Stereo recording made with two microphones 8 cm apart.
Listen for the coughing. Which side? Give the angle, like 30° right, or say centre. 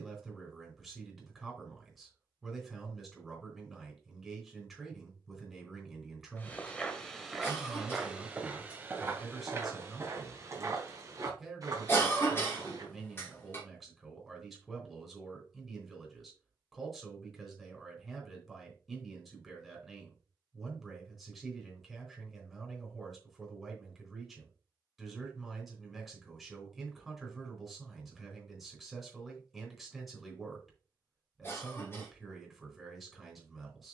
30° left.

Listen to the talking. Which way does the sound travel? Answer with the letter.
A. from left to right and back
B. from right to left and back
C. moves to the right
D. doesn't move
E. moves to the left
D.